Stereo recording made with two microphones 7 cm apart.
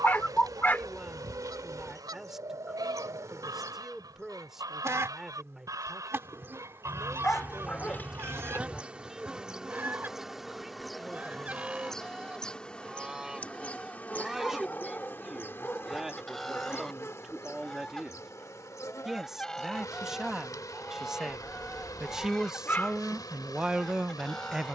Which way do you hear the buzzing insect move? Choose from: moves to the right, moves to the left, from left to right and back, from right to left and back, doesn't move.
moves to the left.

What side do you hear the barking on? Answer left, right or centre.
left.